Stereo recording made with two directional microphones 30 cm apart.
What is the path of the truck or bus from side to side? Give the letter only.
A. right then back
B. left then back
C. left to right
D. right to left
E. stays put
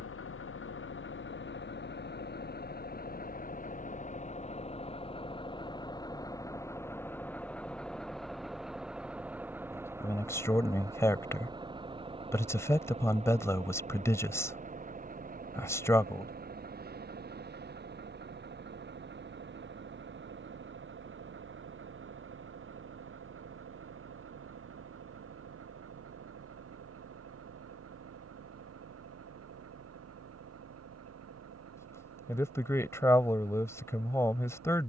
C.